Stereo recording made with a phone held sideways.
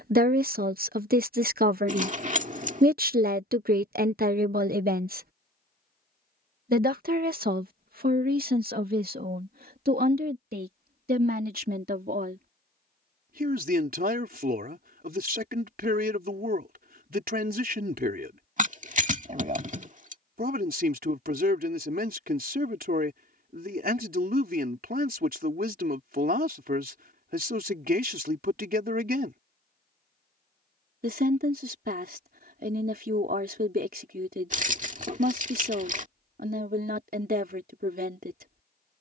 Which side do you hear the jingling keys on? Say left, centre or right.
right.